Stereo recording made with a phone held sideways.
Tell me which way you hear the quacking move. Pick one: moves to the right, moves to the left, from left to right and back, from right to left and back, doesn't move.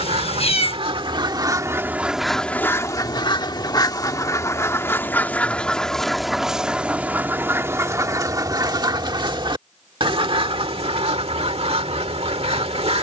from right to left and back.